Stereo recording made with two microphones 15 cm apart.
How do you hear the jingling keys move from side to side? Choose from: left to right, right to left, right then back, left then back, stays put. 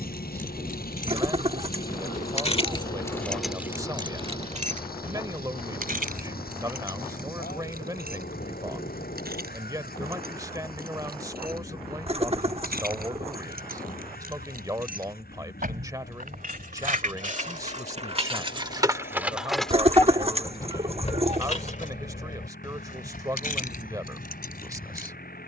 right then back.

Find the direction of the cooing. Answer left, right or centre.
right.